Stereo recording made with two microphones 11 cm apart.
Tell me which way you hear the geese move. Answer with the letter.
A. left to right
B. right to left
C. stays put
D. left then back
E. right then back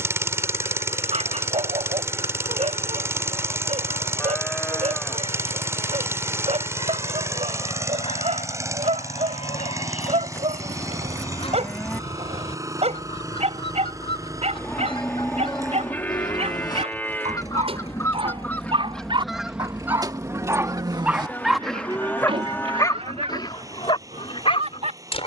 A.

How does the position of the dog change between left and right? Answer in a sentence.
In this clip you hear the dog go from the right side to the left.